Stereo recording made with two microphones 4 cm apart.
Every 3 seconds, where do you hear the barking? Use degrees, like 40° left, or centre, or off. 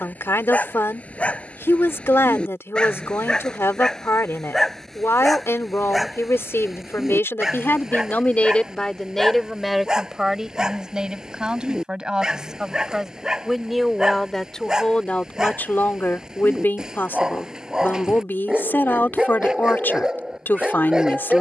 30° left, 10° left, 10° right, 20° right, 20° right, 20° right, 20° right.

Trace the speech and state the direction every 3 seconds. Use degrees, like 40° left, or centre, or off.
70° left, 70° left, 50° left, 10° right, centre, 40° left, 50° left.